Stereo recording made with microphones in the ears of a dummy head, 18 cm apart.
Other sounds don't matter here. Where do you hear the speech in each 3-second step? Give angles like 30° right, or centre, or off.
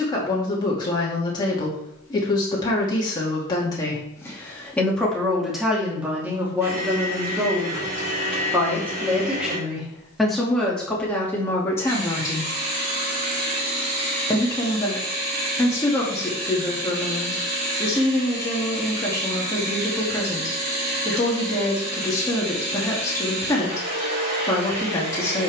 20° left, 10° left, 10° right, centre, 20° left, 20° left, 20° left, 20° left, 20° left.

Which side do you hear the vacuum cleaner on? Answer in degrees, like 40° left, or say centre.
50° right.